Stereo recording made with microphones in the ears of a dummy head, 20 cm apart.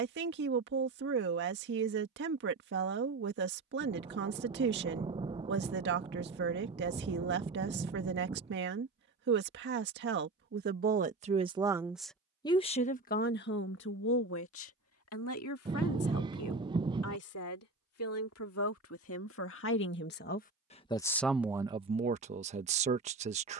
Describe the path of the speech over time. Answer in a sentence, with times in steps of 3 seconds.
You can hear the speech on the right from 0 s, on the left from 12 s and on the right from 21 s.